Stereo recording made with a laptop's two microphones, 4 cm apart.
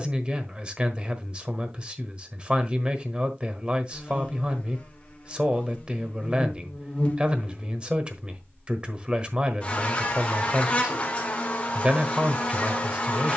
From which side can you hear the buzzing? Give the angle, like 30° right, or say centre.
30° left.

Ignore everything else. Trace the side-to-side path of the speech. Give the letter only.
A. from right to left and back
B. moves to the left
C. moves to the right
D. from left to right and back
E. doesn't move
E.